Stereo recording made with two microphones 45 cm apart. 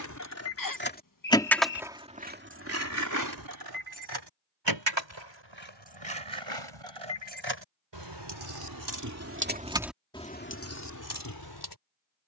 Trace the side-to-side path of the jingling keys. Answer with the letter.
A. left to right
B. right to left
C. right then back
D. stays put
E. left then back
C.